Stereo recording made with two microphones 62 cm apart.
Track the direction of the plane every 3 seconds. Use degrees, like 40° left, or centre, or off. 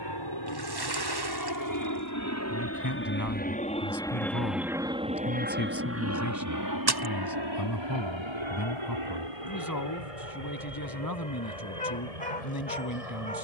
40° left, centre, 40° right, 60° right, 70° right.